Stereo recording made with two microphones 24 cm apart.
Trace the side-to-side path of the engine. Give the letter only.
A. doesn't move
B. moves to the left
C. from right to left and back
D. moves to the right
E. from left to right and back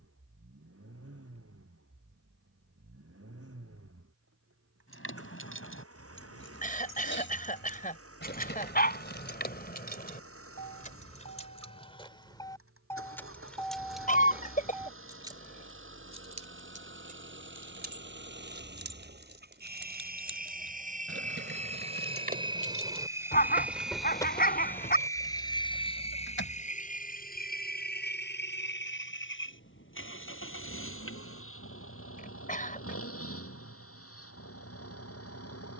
B.